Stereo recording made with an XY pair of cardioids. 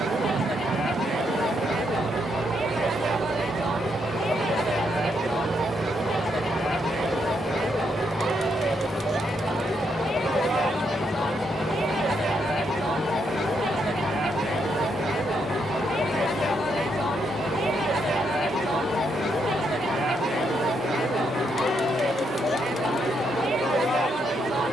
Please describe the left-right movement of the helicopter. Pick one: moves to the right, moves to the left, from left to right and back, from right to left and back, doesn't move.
moves to the left.